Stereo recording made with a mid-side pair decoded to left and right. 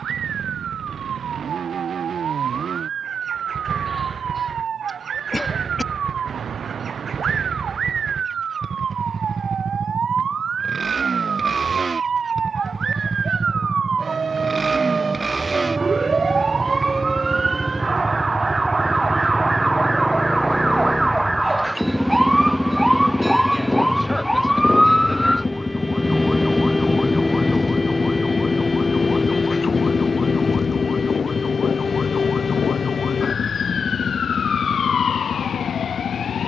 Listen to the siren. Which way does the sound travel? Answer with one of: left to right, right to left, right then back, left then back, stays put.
right to left.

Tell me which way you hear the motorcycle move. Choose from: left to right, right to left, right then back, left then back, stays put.
right to left.